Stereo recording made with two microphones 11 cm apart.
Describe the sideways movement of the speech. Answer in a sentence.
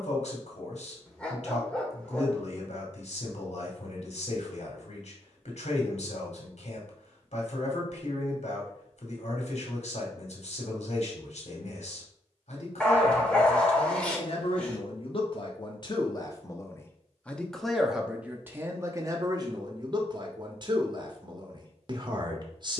You can hear the speech go from the left side to the right.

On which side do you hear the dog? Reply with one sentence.
You can hear the dog in the centre.